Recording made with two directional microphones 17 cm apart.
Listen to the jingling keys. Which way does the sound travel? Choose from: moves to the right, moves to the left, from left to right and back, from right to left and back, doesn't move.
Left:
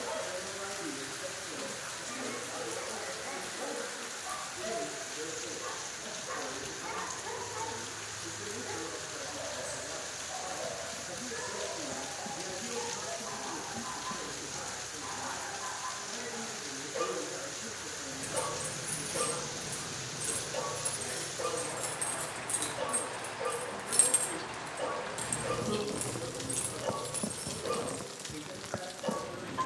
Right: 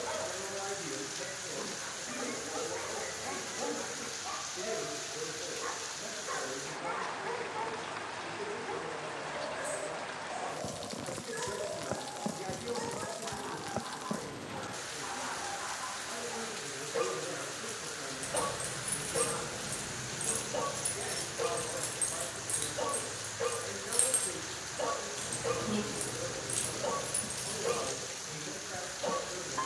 from right to left and back.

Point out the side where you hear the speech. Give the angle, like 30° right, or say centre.
70° right.